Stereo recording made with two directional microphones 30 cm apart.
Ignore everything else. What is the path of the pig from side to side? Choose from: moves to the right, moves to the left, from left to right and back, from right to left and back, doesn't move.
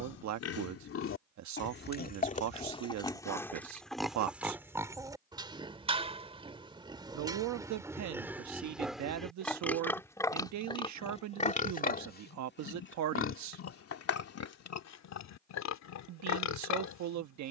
from left to right and back.